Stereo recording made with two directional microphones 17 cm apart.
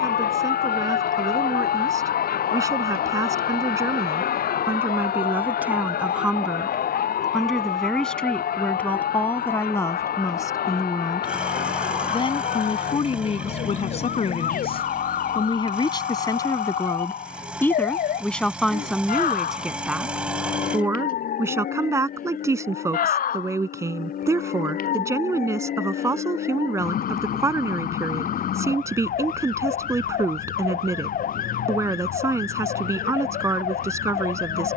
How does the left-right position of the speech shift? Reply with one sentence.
In this clip you hear the speech go left and come back.